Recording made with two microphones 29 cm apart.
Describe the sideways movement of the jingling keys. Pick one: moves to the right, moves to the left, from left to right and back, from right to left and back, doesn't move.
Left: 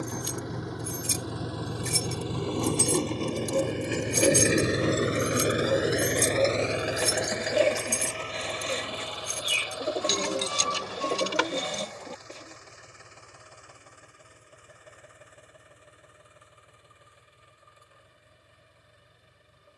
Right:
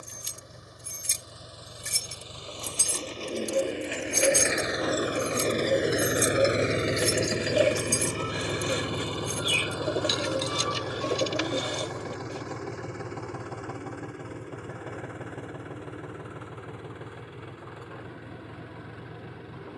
moves to the left.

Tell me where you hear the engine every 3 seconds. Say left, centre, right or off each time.
left, left, right, right, right, right, right.